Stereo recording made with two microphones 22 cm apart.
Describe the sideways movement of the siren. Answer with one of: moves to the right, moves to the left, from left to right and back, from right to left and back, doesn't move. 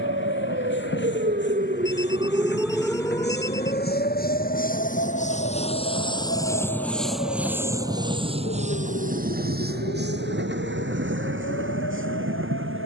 moves to the left.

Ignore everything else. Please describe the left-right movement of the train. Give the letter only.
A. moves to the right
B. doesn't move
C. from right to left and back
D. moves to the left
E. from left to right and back
A.